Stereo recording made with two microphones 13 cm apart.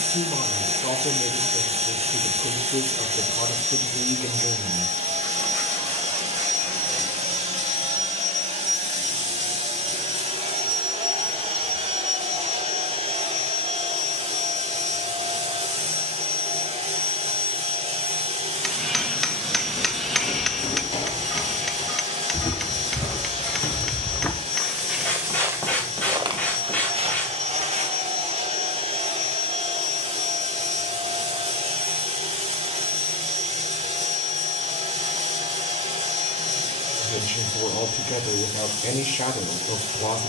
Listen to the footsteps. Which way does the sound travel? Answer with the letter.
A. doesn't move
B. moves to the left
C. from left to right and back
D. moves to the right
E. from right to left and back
D.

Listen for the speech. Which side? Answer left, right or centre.
left.